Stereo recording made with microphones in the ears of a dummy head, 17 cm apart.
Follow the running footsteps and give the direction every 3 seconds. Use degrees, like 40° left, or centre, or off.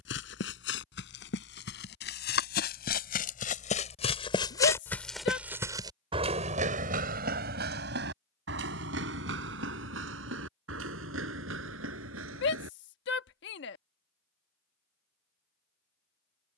60° left, 20° left, 50° right, 70° right, 80° right, off.